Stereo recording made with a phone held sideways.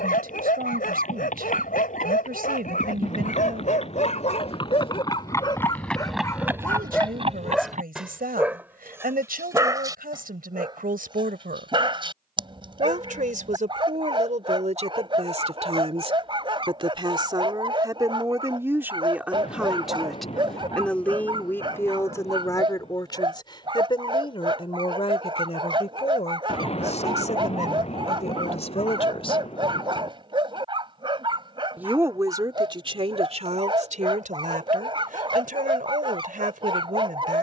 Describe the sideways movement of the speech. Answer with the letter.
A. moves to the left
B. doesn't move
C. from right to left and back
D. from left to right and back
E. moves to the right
C.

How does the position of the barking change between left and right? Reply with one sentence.
In this clip you hear the barking move to the right.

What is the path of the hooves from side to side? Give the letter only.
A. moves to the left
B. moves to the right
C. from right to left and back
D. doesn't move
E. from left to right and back
B.